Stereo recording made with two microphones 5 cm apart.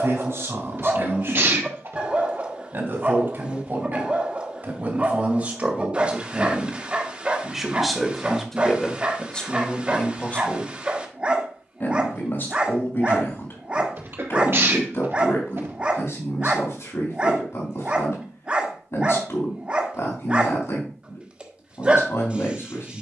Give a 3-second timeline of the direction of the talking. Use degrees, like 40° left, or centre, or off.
60° right, 40° right, 10° right, 30° left, 50° left, 70° left, 70° left, 70° left.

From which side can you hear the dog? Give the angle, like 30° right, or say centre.
20° right.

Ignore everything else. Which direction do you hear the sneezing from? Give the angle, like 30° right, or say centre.
50° right.